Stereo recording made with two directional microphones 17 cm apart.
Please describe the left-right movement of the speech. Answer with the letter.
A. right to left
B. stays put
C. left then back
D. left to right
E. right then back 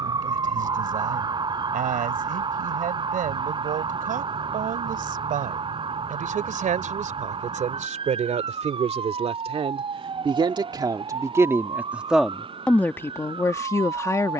A.